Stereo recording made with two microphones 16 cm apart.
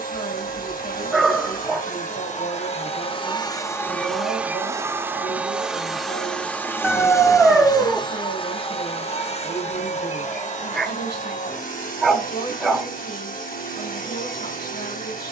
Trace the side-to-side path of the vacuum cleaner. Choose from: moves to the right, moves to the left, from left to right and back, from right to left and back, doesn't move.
from left to right and back.